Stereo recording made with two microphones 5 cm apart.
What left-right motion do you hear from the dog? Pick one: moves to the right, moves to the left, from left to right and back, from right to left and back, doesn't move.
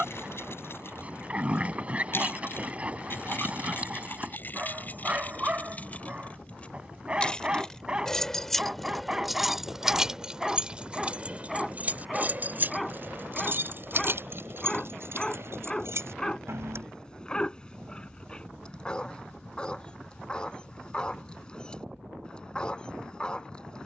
moves to the left.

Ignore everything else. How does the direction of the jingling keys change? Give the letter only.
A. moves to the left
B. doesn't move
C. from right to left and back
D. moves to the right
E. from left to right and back
D.